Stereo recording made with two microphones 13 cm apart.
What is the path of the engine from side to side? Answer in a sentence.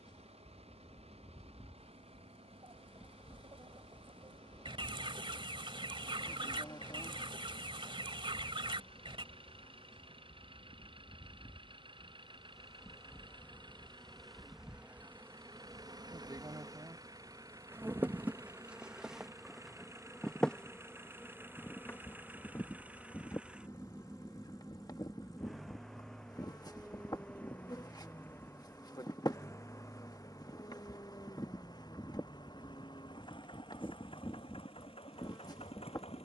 In this clip you hear the engine move to the left.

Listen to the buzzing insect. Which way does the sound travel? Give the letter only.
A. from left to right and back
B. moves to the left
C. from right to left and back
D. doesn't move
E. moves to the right
A.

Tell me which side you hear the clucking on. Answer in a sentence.
In this clip you hear the clucking on the right.